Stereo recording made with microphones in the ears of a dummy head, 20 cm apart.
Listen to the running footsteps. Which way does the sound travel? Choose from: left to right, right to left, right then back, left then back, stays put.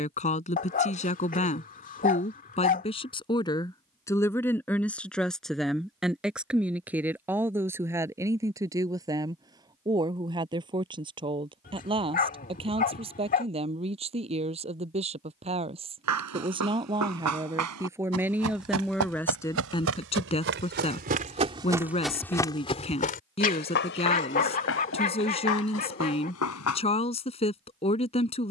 right to left.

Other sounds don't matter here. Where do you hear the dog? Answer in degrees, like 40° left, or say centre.
40° left.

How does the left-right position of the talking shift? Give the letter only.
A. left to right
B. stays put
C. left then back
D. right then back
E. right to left
D.